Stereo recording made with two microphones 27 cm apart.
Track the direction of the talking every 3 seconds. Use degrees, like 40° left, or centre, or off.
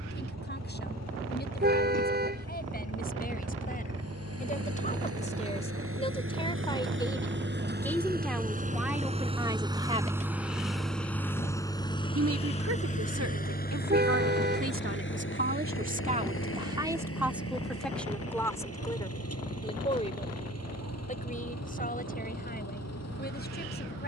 40° left, 30° left, 10° left, 20° right, 60° right, 20° right, 10° left, 30° left.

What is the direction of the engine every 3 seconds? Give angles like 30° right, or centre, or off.
70° right, 60° right, 40° right, centre, 30° left, 50° left, 60° left, 70° left.